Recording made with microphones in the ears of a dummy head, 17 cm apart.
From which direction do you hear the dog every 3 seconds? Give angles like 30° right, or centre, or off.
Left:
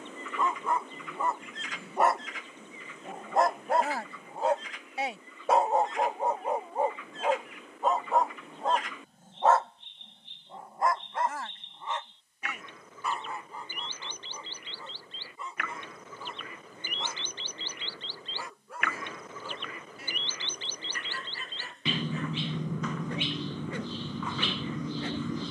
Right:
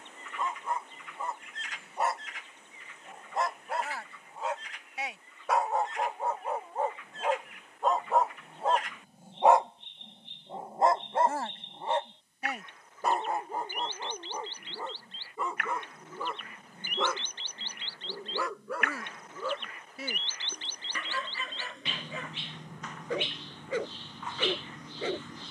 50° left, 30° left, 10° left, 20° right, 40° right, 50° right, 50° right, 60° right, 60° right.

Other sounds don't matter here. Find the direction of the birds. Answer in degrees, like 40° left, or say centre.
60° left.